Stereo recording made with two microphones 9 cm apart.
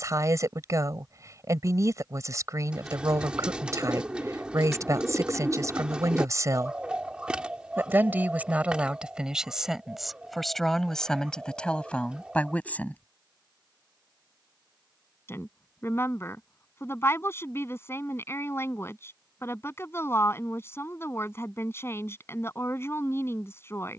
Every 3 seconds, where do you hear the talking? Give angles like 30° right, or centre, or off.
40° right, 40° right, 30° right, centre, 20° left, 30° left, 30° left, 30° left.